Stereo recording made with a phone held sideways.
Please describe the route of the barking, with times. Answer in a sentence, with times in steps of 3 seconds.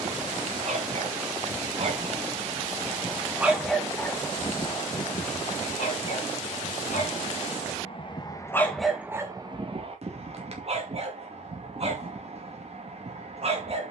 You can hear the barking on the right from 0 s, on the left from 3 s and on the right from 9 s.